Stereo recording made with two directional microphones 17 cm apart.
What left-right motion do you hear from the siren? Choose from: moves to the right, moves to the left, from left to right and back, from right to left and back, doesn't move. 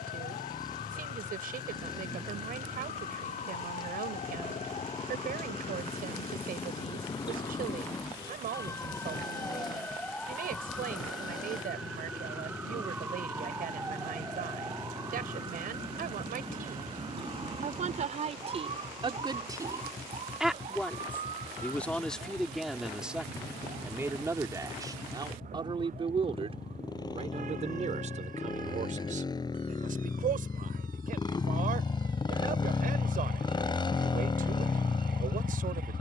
moves to the right.